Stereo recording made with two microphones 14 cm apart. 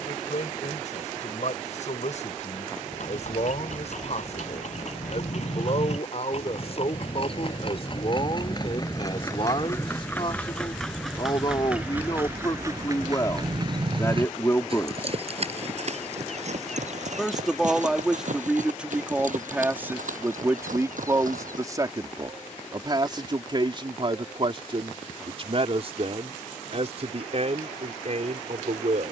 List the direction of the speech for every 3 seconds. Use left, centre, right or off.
left, left, left, left, left, centre, centre, right, right, right.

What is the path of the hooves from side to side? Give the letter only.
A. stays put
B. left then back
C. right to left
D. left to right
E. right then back
D.